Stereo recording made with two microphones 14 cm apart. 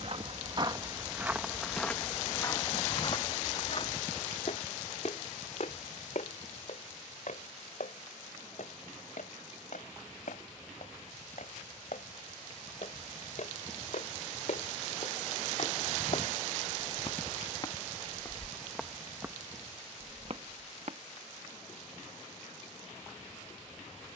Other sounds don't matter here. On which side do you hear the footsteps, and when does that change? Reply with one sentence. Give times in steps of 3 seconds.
You can hear the footsteps in the centre from 0 s, on the left from 3 s, on the right from 18 s and not at all from 21 s.